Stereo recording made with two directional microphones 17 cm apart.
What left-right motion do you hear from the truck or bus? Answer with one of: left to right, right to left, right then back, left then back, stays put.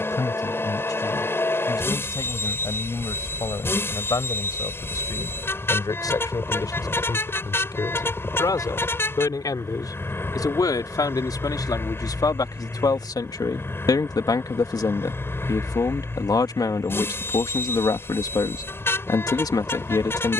stays put.